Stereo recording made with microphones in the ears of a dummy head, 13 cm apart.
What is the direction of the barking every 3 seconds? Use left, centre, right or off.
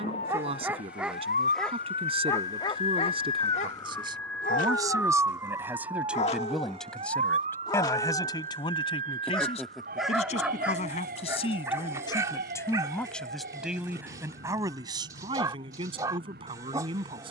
centre, left, left, centre, right, right.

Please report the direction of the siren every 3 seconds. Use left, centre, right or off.
left, centre, right, right, right, right.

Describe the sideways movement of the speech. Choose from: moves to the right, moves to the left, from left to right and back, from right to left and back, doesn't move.
from right to left and back.